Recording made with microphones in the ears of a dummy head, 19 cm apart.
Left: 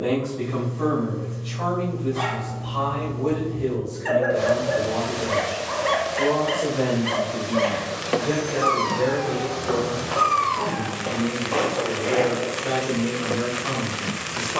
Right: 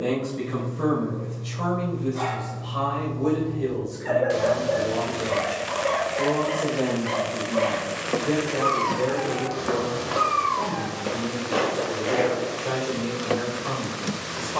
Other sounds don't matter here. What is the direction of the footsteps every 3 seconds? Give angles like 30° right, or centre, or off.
off, off, 60° right, 30° right, centre.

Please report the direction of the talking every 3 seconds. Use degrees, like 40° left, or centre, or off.
30° right, 10° right, 10° left, 20° left, 30° left.